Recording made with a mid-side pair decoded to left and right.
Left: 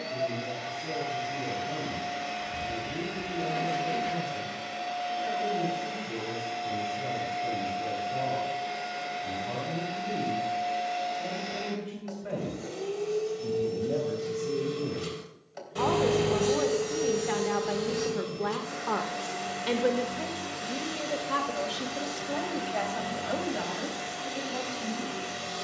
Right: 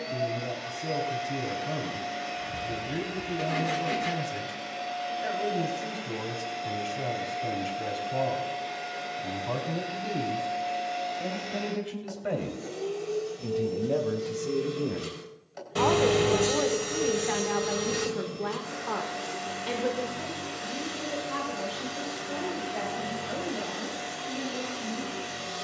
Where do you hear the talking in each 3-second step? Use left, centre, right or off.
right, right, right, right, right, centre, left, left, left.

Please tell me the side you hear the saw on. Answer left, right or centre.
right.